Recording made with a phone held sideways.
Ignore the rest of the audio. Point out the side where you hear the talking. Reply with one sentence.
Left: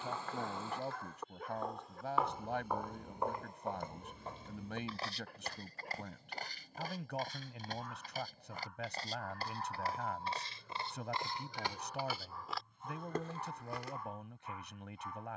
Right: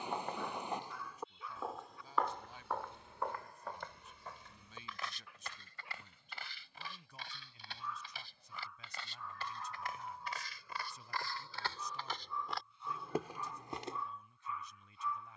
In this clip you hear the talking on the left.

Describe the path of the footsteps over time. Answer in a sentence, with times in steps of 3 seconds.
In this clip you hear the footsteps in the centre from 0 s, on the left from 3 s and in the centre from 12 s.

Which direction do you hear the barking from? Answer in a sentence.
In this clip you hear the barking on the left.